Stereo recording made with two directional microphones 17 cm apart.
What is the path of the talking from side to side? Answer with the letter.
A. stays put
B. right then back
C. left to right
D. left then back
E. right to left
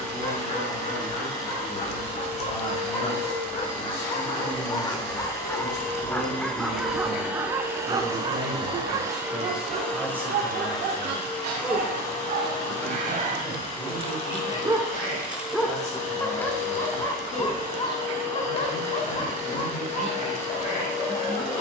B.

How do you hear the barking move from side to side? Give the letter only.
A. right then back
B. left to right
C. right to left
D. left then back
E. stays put
A.